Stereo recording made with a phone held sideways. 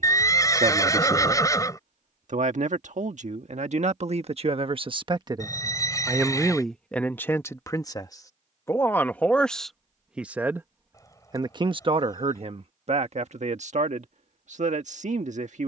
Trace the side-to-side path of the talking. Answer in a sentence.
You can hear the talking go left and come back.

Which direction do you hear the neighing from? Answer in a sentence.
You can hear the neighing on the left.